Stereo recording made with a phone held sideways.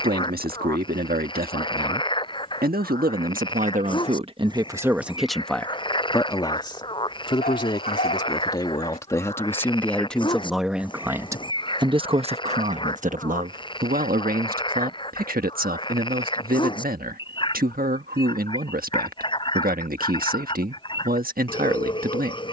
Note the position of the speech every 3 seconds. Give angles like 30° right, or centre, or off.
80° right, 30° right, 30° left, centre, 60° right, 70° right, 70° right, 70° right.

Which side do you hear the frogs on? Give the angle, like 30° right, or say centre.
30° left.